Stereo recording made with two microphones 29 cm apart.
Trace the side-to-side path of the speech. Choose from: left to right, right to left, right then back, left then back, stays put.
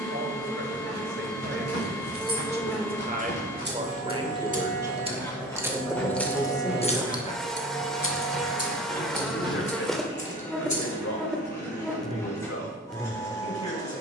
right to left.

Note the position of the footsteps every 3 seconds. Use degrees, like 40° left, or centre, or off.
50° left, 20° left, 10° right, 20° right, off.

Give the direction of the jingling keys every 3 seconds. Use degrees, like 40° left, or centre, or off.
50° right, 20° right, 30° left, 70° left, off.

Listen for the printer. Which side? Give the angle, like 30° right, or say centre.
10° left.